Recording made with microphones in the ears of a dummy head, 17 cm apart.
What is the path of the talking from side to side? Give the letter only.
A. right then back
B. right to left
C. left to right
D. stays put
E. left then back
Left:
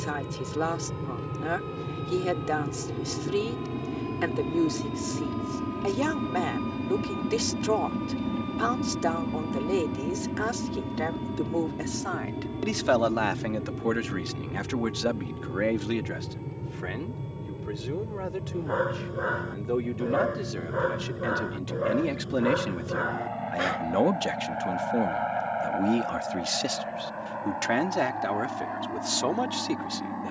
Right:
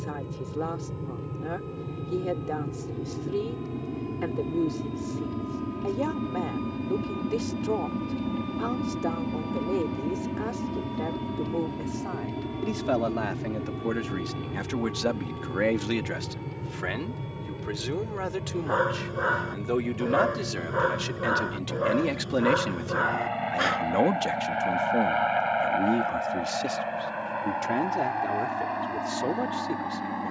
A.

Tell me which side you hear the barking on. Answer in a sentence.
In this clip you hear the barking on the right.